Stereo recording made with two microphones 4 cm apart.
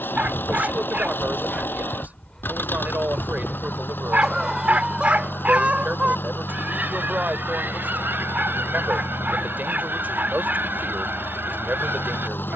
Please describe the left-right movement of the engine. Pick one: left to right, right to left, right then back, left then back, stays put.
stays put.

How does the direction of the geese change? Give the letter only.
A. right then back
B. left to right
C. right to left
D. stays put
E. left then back
B.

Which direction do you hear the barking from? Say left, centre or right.
right.